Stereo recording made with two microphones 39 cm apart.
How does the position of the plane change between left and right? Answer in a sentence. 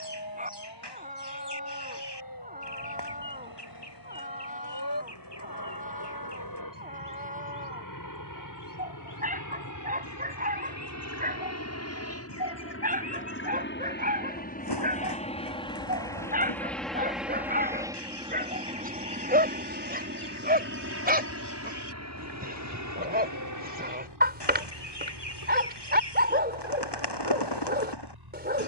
You can hear the plane go from the left side to the right.